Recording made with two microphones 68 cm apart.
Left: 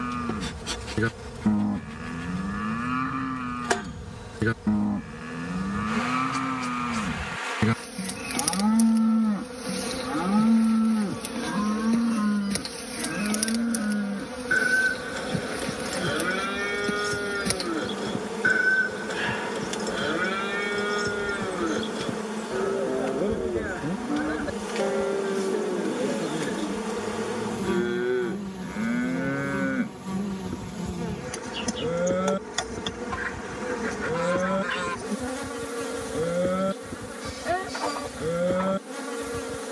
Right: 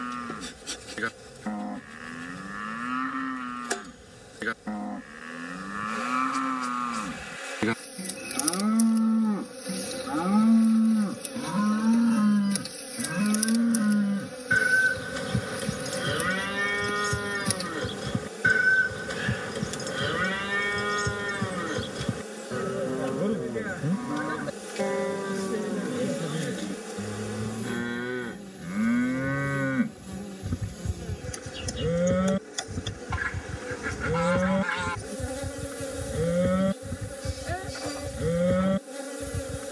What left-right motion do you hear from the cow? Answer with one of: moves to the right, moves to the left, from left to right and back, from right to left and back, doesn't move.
moves to the right.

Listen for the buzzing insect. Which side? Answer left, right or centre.
left.